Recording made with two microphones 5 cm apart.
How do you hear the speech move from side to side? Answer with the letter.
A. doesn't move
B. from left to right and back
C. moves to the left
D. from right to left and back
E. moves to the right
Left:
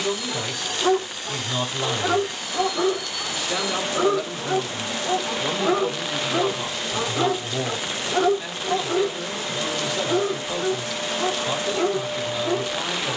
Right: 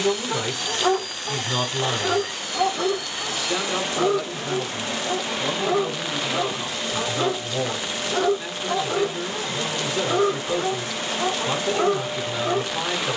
D.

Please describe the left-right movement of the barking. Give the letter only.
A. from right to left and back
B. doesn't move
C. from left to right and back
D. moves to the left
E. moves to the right
A.